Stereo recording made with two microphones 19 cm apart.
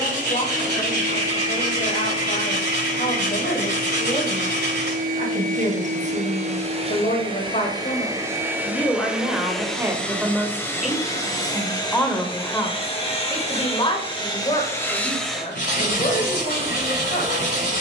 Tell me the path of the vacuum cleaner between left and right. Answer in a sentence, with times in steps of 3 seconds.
In this clip you hear the vacuum cleaner on the right from 0 s, in the centre from 9 s, on the left from 12 s and on the right from 15 s.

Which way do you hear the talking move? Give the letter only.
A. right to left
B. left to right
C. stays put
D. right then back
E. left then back
D.